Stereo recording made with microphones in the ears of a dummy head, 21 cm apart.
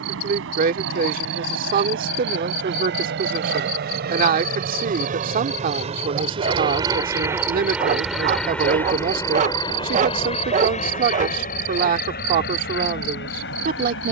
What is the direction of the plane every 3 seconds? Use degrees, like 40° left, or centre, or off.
60° right, 40° right, 10° right, 30° left, 40° left.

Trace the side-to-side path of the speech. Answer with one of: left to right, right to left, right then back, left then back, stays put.
stays put.